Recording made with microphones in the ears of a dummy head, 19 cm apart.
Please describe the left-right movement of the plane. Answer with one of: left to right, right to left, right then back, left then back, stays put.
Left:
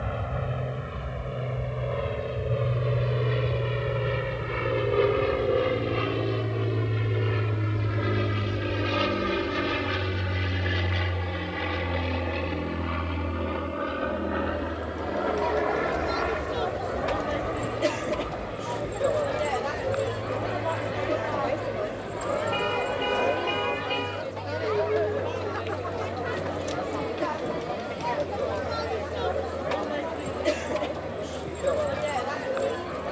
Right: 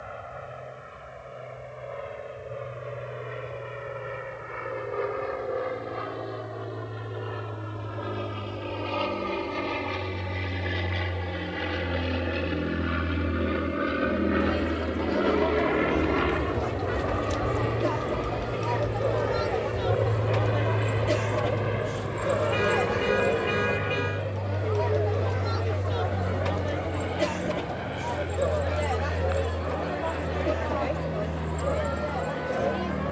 left to right.